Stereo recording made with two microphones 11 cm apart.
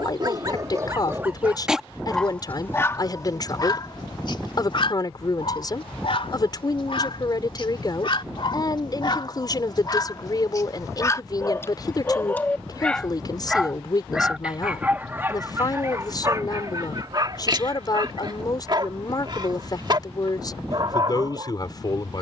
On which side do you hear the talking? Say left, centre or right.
left.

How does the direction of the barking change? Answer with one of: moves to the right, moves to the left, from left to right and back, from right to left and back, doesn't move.
from right to left and back.